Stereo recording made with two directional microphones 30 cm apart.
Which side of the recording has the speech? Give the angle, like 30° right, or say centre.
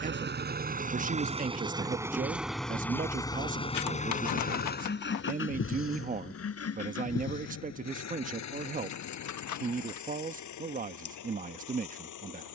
30° right.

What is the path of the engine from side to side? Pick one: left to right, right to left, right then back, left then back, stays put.
right to left.